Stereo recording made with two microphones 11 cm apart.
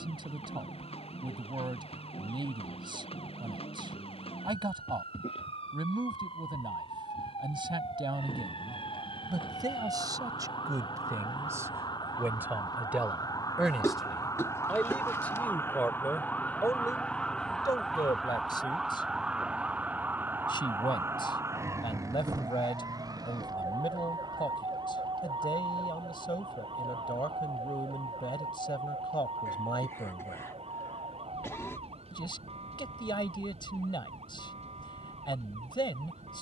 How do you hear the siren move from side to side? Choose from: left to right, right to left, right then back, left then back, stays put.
left to right.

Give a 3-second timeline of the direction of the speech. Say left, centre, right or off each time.
right, right, right, right, centre, left, left, left, left, left, left, left.